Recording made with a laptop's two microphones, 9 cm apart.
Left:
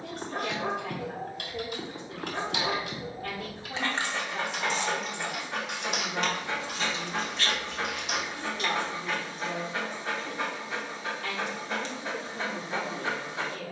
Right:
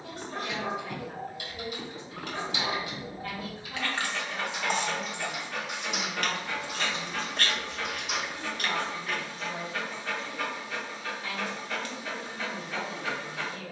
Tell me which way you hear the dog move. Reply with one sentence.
You can hear the dog stay in one place.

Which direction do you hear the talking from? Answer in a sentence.
In this clip you hear the talking on the left.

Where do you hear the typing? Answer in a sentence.
In this clip you hear the typing on the left.